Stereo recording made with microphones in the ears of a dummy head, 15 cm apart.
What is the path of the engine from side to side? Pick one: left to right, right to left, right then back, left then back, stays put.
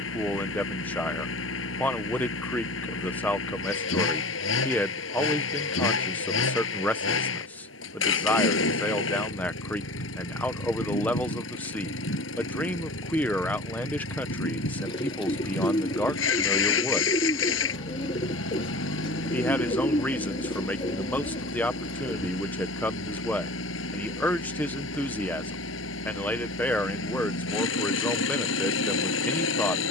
stays put.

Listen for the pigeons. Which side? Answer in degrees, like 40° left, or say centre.
30° left.